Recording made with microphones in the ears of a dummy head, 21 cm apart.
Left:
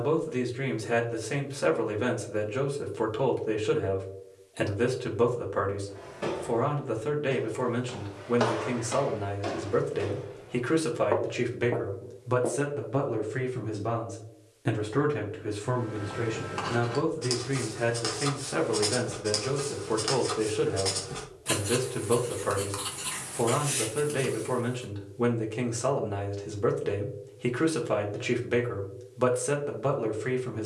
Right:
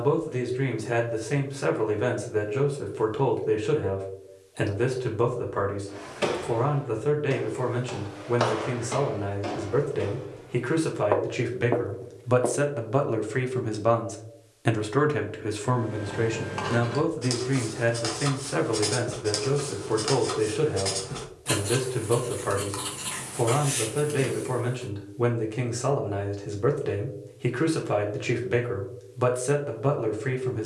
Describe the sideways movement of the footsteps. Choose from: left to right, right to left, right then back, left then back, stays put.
left then back.